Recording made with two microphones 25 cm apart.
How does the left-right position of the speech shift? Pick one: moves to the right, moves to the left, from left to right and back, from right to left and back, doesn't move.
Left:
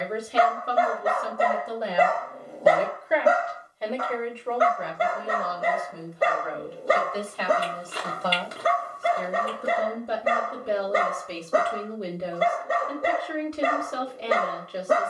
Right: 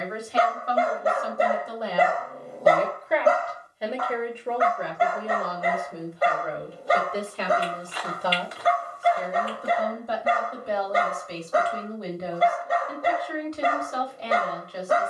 from left to right and back.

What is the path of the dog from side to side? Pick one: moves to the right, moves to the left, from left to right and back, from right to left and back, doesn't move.
moves to the left.